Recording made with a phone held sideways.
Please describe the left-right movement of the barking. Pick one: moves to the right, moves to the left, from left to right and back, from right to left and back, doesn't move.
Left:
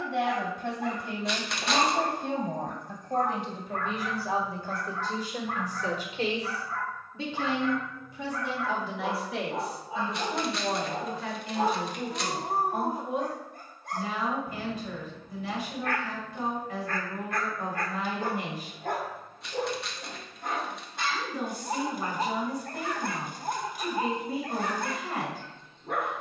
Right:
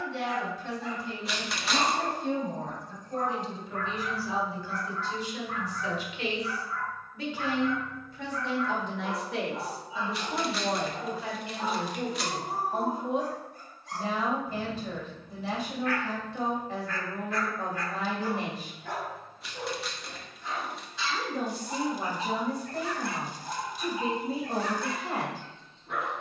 doesn't move.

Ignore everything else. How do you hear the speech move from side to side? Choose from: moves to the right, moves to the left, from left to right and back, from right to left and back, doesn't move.
moves to the right.